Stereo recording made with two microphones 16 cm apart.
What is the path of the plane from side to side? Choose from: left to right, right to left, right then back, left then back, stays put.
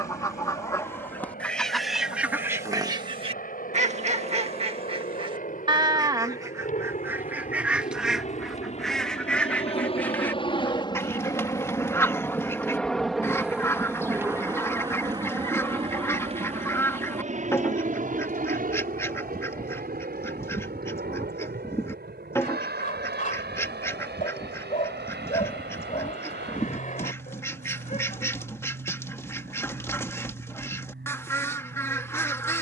left to right.